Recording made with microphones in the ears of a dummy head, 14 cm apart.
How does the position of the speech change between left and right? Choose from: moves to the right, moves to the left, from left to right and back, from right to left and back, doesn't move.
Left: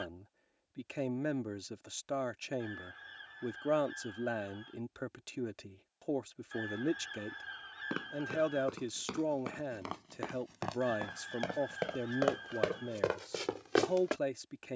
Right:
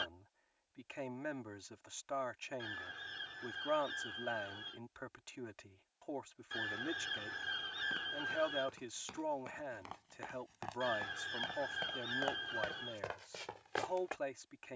doesn't move.